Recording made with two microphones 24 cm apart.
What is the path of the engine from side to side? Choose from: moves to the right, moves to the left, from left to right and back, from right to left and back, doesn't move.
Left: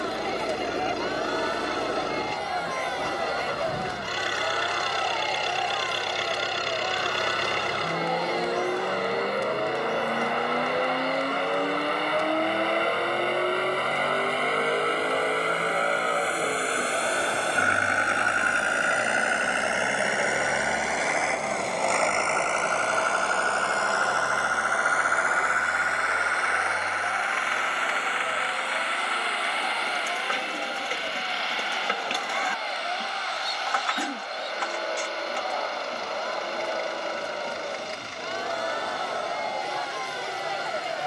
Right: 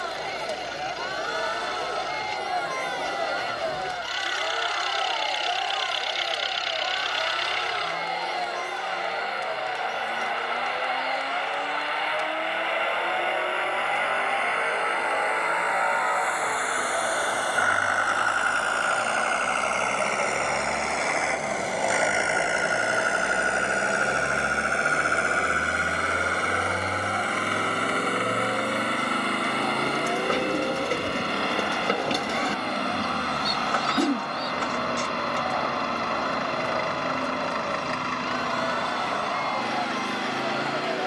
moves to the right.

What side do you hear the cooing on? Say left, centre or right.
right.